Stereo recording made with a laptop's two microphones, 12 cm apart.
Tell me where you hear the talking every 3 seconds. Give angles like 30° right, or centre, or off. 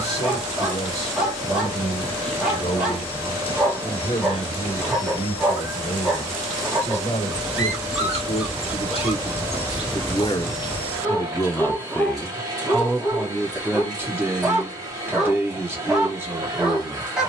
70° left, 70° left, 70° left, 40° left, 10° right, 20° right.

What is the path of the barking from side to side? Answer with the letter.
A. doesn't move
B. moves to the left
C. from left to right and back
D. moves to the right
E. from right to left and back
A.